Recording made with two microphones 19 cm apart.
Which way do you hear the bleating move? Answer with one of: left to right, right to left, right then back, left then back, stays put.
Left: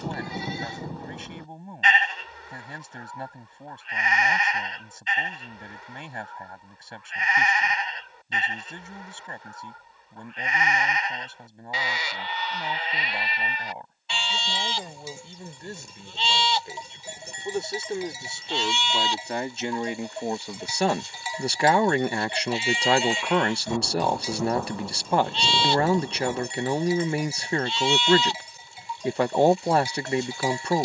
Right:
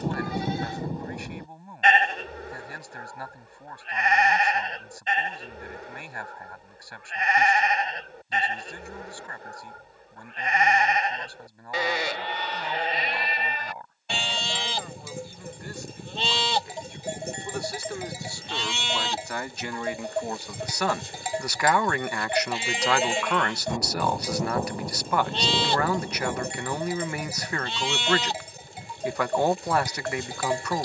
stays put.